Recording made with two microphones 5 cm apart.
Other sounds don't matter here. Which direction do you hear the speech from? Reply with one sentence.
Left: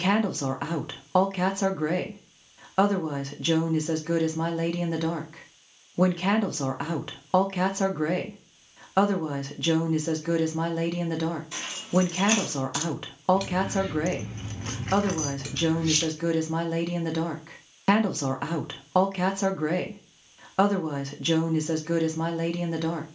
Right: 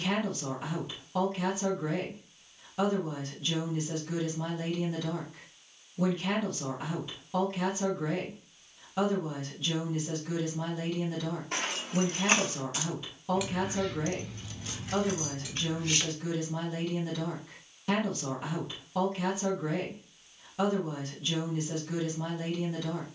In this clip you hear the speech on the left.